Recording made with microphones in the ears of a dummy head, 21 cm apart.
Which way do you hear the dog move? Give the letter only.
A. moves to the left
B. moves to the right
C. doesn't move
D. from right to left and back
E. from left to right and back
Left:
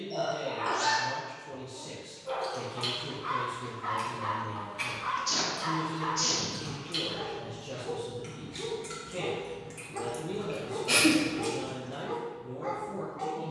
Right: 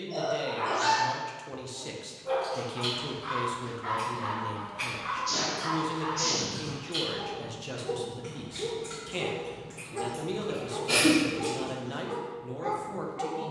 D.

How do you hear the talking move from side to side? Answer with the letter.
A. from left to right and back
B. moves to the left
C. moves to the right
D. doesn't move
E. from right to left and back
D.